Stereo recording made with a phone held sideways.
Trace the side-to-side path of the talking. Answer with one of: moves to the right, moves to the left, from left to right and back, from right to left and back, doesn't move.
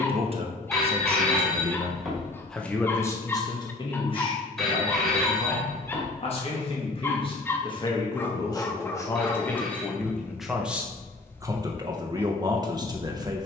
from right to left and back.